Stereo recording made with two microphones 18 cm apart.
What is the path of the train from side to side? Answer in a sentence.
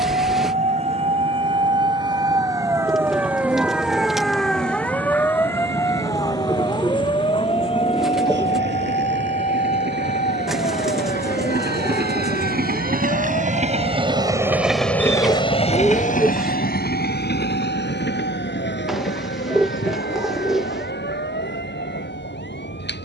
You can hear the train go from the right side to the left.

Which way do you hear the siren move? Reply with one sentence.
In this clip you hear the siren move from right to left.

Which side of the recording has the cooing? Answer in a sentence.
In this clip you hear the cooing in the centre.